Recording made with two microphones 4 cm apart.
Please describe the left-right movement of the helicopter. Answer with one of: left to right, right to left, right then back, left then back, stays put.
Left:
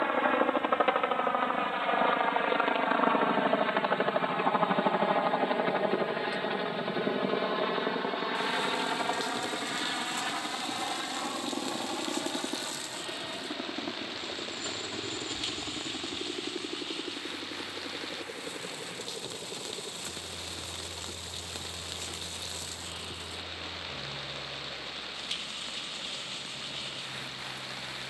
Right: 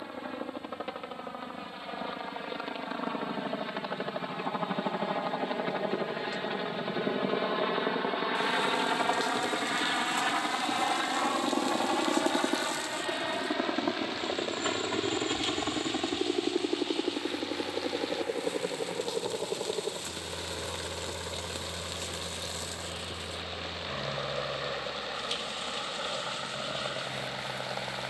left to right.